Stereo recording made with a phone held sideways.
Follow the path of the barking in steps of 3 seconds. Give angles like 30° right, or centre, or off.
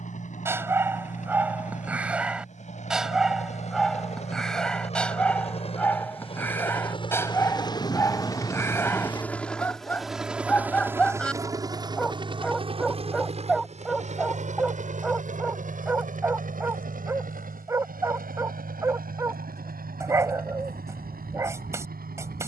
10° right, centre, 20° left, 10° left, centre, 10° right, 20° right, 20° right.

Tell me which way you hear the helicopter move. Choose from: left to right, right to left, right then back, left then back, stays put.
left to right.